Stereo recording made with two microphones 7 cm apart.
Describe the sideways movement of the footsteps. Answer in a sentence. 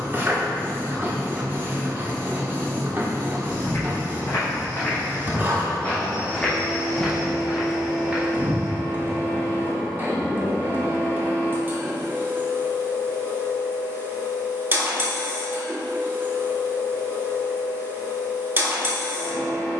You can hear the footsteps move to the right.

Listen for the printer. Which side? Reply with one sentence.
In this clip you hear the printer on the right.